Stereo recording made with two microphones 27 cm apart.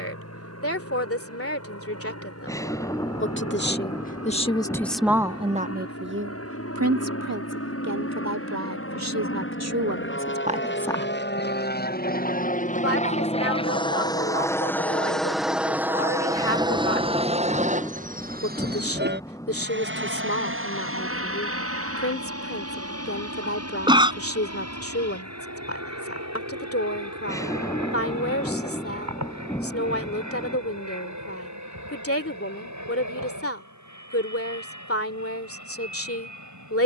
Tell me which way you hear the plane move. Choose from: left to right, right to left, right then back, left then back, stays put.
left to right.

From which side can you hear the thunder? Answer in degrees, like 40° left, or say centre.
10° left.